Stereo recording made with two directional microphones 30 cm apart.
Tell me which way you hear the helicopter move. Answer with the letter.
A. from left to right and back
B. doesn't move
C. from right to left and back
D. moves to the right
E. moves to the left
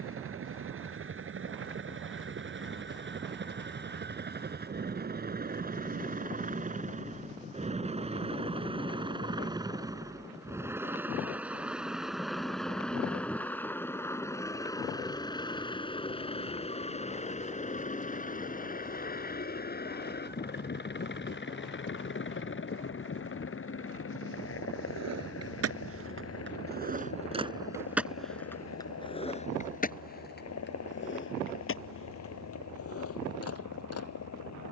E.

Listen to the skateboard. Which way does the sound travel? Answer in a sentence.
In this clip you hear the skateboard move to the left.